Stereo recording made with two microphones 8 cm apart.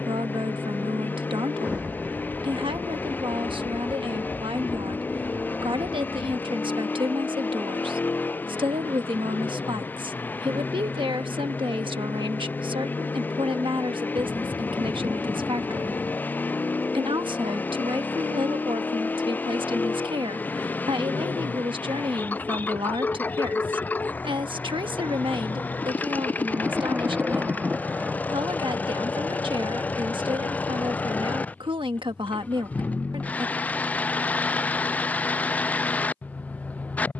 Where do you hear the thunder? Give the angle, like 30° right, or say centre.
10° right.